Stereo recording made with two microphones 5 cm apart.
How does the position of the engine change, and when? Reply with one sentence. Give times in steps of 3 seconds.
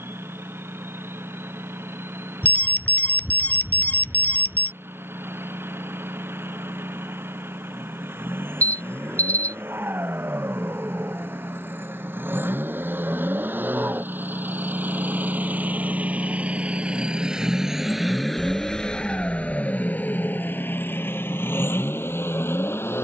You can hear the engine on the right from 0 s and on the left from 18 s.